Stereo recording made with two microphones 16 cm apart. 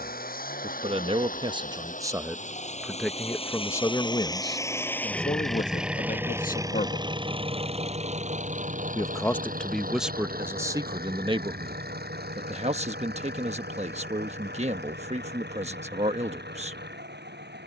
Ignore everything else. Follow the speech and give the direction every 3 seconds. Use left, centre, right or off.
right, left, left, centre, right, right.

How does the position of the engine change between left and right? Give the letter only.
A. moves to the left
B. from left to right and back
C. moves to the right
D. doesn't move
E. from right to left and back
C.